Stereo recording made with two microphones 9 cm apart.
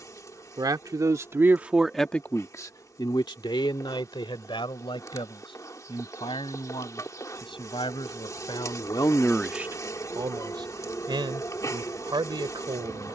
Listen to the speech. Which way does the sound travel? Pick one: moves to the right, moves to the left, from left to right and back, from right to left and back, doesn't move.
from right to left and back.